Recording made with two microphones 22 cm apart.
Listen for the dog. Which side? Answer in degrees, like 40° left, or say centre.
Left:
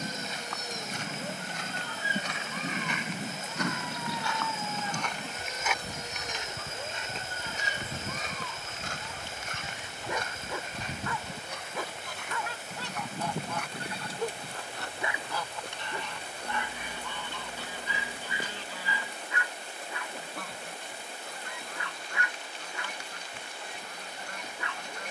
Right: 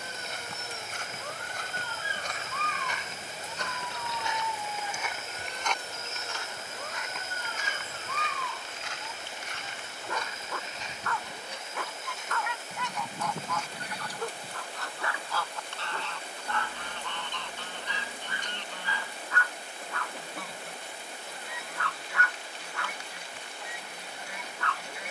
20° left.